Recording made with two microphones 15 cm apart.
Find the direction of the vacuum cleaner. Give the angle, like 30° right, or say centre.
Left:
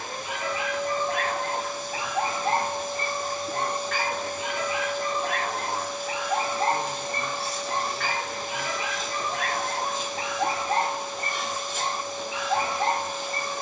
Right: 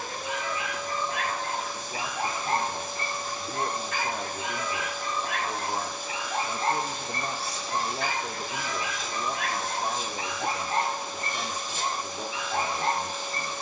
60° left.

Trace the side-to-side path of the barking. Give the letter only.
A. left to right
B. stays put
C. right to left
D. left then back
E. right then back
B.